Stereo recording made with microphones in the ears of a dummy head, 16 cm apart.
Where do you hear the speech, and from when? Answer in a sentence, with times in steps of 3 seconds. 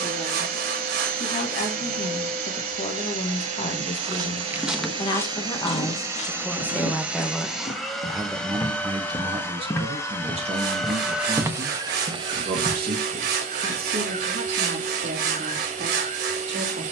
In this clip you hear the speech on the left from 0 s, in the centre from 6 s and on the right from 9 s.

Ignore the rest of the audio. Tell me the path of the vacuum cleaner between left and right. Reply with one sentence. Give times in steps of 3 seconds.
You can hear the vacuum cleaner on the right from 0 s, in the centre from 6 s and on the right from 12 s.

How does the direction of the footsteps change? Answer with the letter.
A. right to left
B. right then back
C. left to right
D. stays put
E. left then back
E.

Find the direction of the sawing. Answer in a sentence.
You can hear the sawing on the right.